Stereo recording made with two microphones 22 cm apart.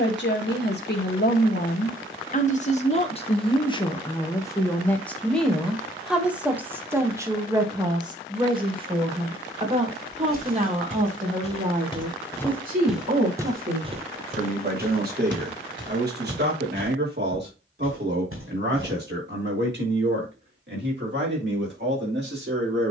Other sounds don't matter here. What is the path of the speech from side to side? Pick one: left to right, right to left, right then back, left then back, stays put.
left to right.